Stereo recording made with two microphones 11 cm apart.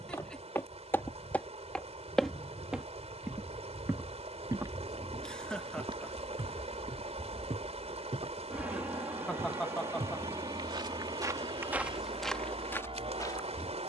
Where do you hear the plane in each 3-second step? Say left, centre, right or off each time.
left, left, centre, right, right.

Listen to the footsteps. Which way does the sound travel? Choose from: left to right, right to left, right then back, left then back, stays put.
right then back.